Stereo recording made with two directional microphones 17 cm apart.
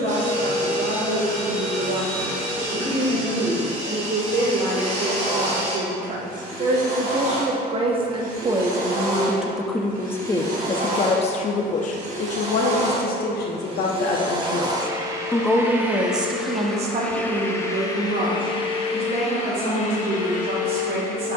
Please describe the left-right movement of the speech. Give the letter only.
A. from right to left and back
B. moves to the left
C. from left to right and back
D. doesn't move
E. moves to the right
A.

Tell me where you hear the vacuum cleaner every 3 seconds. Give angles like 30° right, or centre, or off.
70° right, 60° right, 60° right, 50° right, 30° right, centre, 40° left.